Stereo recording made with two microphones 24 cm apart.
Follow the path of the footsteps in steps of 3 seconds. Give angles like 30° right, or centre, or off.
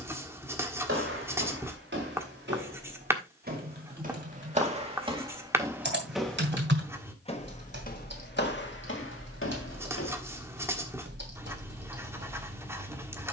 50° right, 30° right, 30° left, 60° left, off.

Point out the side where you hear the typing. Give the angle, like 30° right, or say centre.
50° right.